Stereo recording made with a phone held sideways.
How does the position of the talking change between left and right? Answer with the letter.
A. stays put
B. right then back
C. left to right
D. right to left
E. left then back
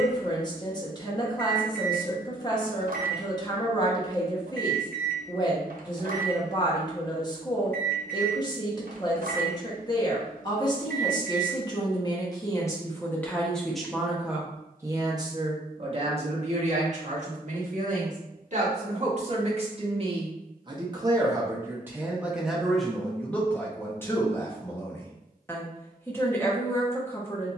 B.